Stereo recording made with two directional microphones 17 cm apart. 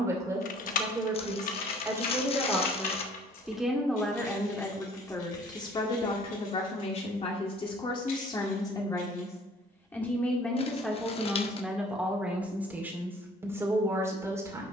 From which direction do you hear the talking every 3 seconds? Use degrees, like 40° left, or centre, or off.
20° right, 10° left, 30° left, centre, 10° right.